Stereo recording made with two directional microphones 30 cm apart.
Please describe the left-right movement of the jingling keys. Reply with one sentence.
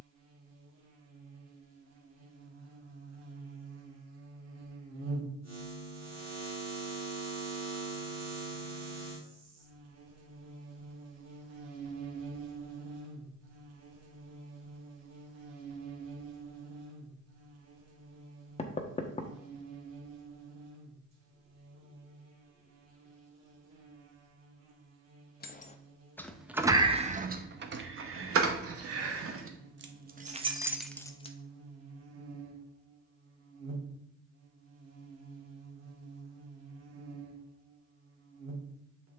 In this clip you hear the jingling keys move from left to right and back again.